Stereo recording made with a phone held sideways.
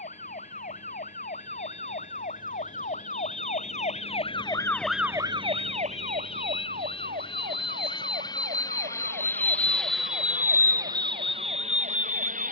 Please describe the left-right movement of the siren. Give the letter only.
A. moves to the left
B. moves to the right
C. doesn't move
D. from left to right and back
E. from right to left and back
B.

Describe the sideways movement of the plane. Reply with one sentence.
In this clip you hear the plane travel towards the right.